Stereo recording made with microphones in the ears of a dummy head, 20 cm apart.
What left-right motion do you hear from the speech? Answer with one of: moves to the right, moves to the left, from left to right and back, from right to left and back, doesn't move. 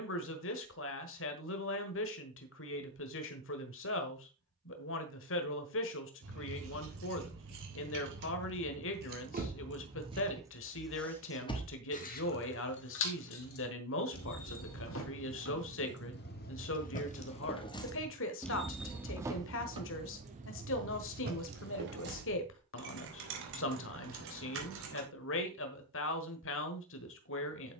doesn't move.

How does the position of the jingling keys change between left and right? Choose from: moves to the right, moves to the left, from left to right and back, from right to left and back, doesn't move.
from right to left and back.